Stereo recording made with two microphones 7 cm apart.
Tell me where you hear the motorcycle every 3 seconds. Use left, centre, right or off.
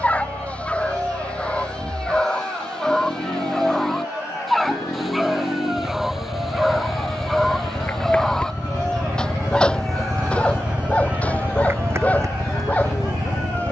left, left, left, centre, right.